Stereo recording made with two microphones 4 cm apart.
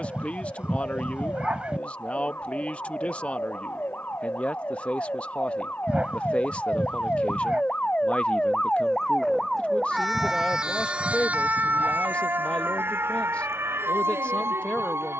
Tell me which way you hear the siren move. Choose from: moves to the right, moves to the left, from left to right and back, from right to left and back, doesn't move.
moves to the right.